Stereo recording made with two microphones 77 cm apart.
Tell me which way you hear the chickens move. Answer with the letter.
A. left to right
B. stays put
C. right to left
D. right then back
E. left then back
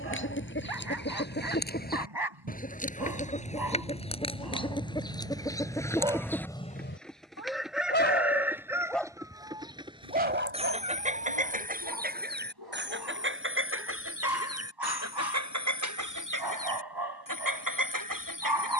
A.